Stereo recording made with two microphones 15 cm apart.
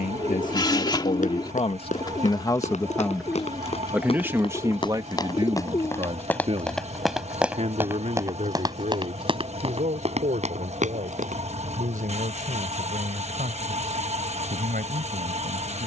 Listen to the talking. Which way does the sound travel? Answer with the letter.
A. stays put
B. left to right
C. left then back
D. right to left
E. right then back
B.